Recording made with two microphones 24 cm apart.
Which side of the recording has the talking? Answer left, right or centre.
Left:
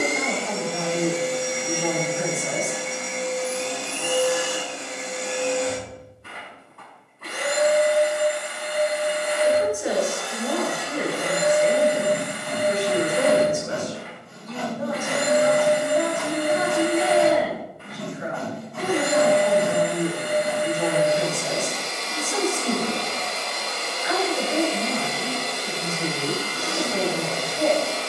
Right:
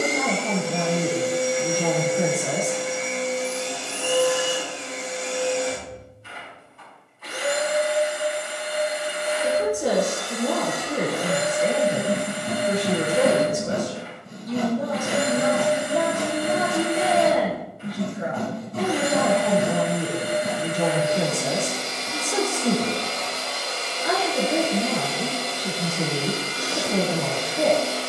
right.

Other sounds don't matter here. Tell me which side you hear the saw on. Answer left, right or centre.
right.